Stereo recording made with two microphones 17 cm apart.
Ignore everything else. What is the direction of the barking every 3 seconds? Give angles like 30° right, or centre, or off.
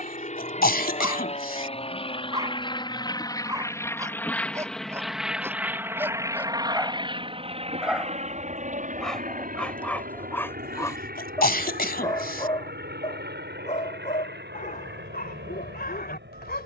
20° right, 20° right, 10° right, 10° left, 40° left, 70° left.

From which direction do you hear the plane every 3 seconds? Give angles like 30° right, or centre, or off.
40° left, 10° left, 30° right, 50° right, 70° right, 70° right.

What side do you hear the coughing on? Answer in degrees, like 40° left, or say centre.
70° left.